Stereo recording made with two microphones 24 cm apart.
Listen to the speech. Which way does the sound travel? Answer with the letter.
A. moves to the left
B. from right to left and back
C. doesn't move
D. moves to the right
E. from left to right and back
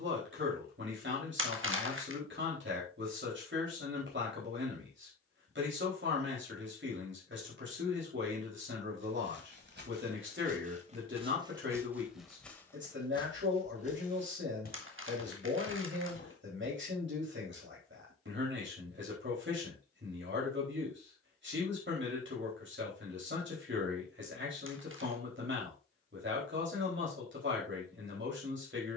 C.